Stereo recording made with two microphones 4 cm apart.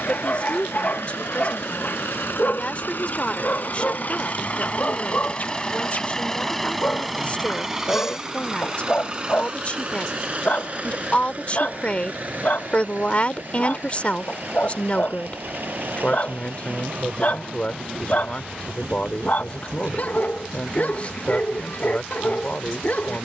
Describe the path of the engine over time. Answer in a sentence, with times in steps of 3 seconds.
In this clip you hear the engine on the left from 0 s, in the centre from 6 s and on the right from 9 s.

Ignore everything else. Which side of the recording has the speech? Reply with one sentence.
In this clip you hear the speech on the left.